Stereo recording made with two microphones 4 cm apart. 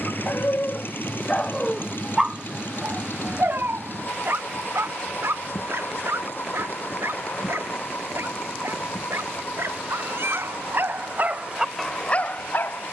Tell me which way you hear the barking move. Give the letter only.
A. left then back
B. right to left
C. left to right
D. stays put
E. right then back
E.